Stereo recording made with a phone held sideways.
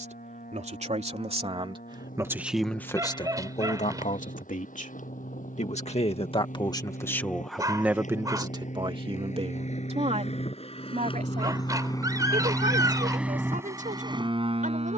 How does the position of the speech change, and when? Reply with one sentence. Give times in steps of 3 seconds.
You can hear the speech on the right from 0 s, on the left from 3 s, in the centre from 6 s and on the right from 9 s.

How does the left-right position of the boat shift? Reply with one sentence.
You can hear the boat go from the left side to the right.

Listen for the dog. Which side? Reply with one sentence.
In this clip you hear the dog on the right.